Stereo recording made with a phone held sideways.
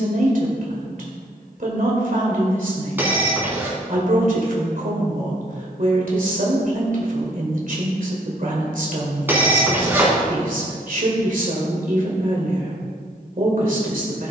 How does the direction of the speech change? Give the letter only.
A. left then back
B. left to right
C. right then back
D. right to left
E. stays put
E.